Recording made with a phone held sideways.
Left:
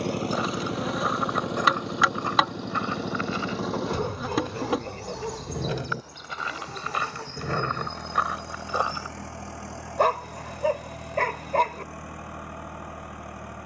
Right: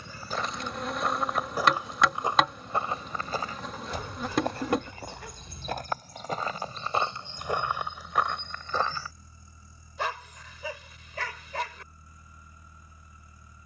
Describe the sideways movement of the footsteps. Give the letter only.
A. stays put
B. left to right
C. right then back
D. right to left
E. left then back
C.